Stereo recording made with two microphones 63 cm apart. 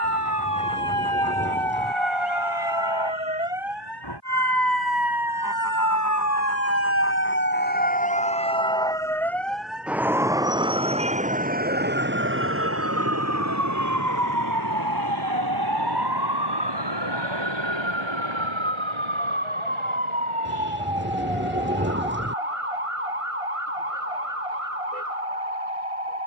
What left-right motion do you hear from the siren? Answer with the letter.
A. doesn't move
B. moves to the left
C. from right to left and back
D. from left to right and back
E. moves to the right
E.